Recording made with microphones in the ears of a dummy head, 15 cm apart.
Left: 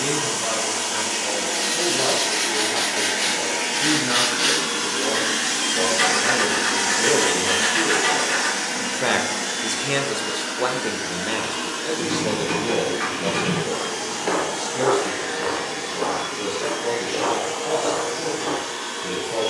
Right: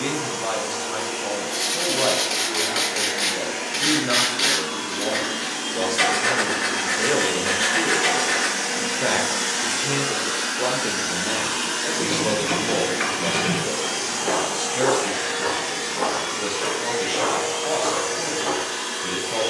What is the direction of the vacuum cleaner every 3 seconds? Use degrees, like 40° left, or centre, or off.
70° left, 60° left, 20° left, 30° right, 50° right, 60° right, 60° right.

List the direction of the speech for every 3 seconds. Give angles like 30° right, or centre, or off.
30° right, 30° right, 10° right, 20° left, 20° right, 30° right, 30° right.